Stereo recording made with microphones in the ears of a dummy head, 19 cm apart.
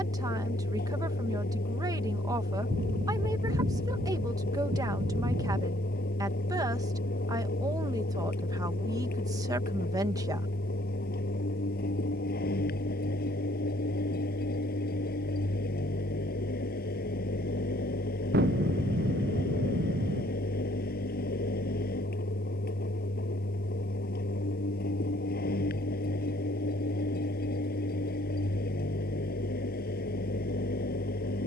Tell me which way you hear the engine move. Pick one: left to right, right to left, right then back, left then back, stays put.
stays put.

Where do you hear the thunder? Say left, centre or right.
right.